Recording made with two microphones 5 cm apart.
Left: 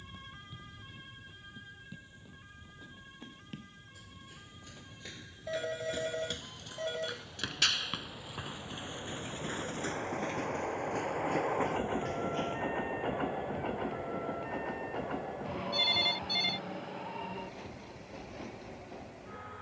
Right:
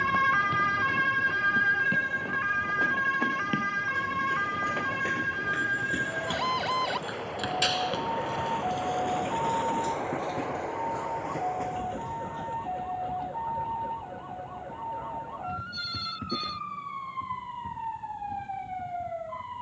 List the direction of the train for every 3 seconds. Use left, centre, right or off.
right, right, right, centre, left, left, left.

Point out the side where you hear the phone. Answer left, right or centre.
left.